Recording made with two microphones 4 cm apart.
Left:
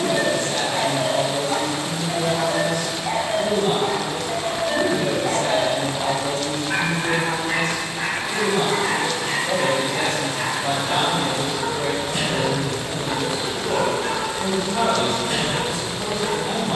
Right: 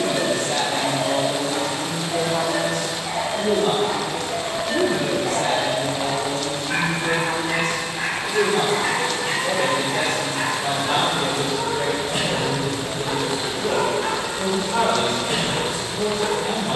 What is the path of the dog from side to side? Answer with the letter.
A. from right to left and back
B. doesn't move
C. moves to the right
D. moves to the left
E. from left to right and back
C.